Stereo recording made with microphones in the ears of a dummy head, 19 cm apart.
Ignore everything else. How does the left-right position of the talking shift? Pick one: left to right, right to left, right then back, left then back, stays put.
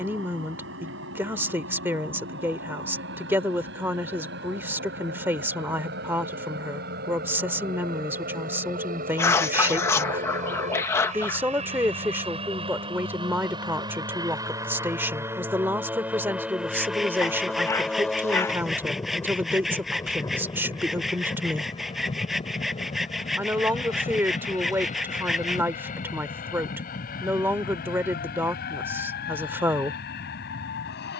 stays put.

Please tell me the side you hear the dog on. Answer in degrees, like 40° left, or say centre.
10° left.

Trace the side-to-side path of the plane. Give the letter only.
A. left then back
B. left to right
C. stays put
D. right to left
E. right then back
D.